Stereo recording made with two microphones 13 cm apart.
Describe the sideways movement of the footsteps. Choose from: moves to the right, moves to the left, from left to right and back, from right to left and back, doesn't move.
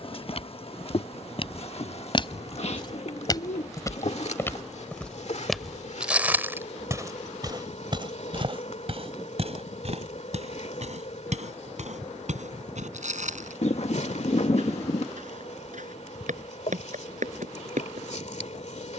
moves to the right.